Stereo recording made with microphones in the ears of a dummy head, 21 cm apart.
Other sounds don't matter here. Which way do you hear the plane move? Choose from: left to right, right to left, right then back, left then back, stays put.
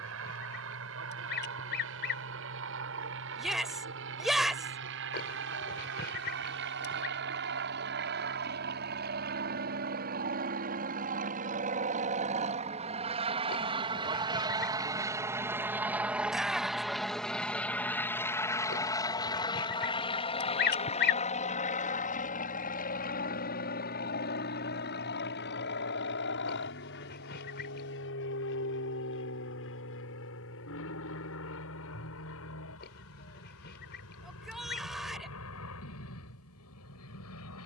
right to left.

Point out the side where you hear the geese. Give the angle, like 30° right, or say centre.
50° left.